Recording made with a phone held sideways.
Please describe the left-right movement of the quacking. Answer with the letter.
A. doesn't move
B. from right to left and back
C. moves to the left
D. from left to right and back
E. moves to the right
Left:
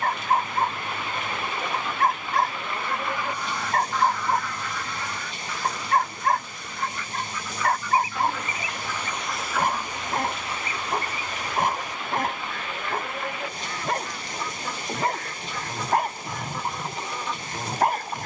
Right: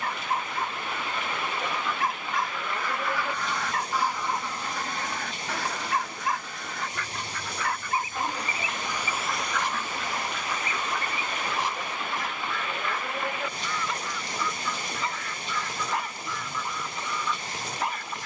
D.